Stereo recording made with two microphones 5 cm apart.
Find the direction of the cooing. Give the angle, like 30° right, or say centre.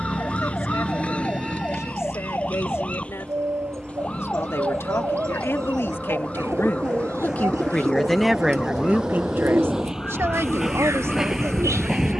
80° right.